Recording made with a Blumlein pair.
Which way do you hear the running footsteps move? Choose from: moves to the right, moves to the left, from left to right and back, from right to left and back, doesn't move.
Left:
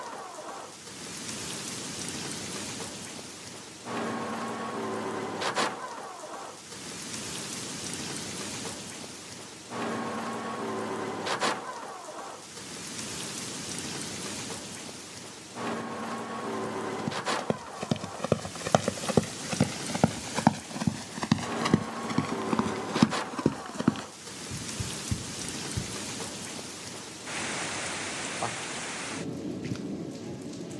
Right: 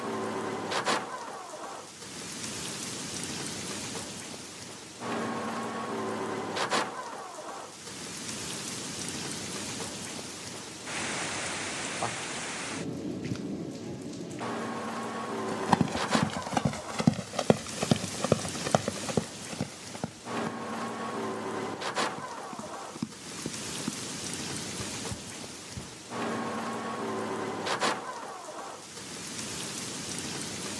moves to the left.